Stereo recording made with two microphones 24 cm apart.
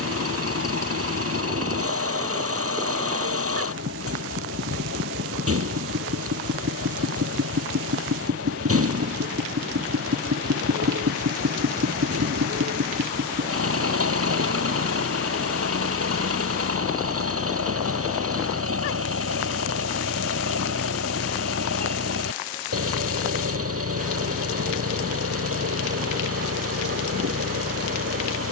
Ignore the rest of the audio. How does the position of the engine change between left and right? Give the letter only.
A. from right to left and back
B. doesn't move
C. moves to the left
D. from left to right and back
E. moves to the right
B.